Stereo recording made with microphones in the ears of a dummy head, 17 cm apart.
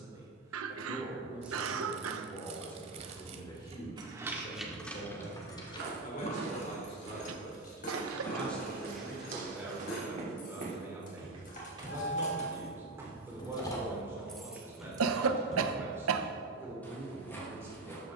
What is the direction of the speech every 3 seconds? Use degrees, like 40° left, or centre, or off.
centre, 30° left, 20° left, 10° right, 10° right, 10° right.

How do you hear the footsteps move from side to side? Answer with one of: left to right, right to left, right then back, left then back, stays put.
right to left.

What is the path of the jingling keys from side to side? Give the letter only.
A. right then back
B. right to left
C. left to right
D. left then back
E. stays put
D.